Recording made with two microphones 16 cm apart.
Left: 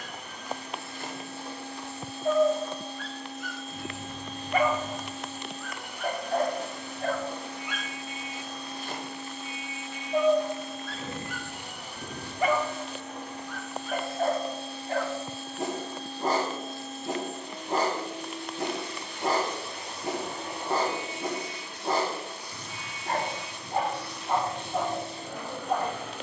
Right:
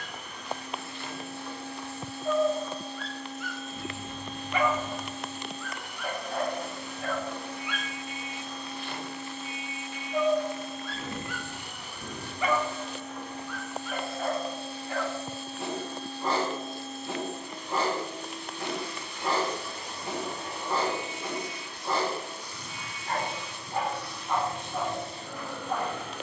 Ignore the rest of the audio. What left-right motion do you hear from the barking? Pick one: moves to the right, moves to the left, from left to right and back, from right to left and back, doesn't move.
doesn't move.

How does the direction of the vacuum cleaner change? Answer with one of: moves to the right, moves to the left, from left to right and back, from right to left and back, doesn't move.
doesn't move.